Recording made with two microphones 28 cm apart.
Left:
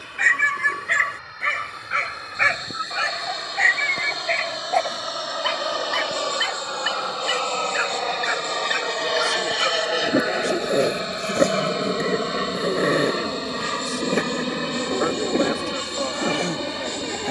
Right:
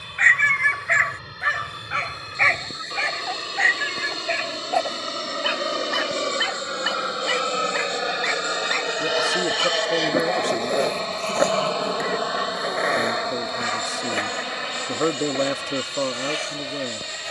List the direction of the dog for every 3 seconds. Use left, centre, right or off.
left, centre, centre, left, left, left.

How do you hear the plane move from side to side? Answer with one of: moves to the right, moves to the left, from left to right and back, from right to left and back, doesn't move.
moves to the left.